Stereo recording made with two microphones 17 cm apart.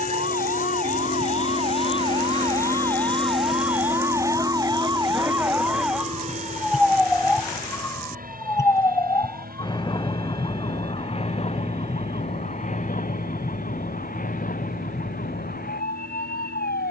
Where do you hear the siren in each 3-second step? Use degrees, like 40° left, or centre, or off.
40° right, 20° right, 10° left, 30° left, 50° left, 60° left.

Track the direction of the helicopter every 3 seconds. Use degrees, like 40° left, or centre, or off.
40° left, 20° right, 50° right, 60° right, 60° right, 70° right.